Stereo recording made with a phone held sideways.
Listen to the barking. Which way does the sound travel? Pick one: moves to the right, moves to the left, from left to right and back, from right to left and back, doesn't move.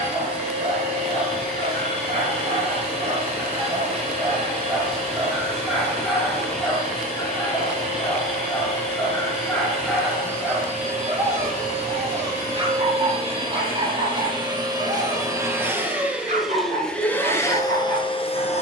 from right to left and back.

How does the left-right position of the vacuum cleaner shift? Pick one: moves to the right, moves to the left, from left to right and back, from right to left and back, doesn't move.
moves to the left.